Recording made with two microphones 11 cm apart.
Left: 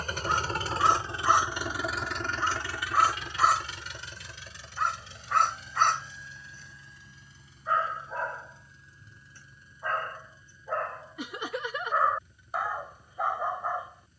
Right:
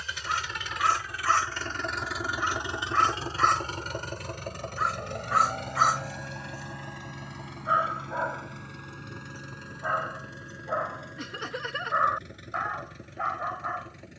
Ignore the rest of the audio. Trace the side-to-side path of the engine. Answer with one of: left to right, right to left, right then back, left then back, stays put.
left to right.